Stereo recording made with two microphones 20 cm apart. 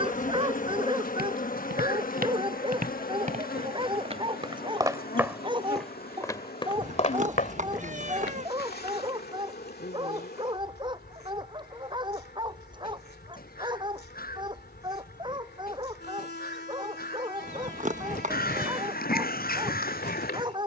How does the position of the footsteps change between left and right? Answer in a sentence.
In this clip you hear the footsteps move from right to left.